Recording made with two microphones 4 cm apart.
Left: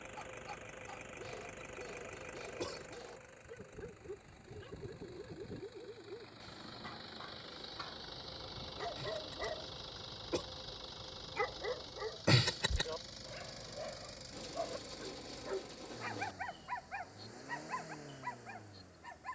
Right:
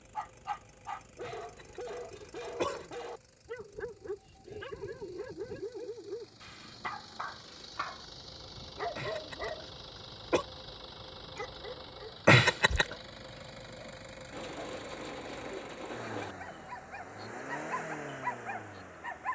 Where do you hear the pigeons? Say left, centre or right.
right.